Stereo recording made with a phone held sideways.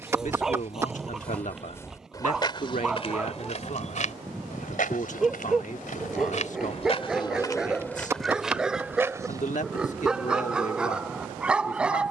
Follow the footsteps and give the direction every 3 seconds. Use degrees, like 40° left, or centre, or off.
20° left, 60° left, 20° left, 20° right.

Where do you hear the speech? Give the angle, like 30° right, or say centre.
60° left.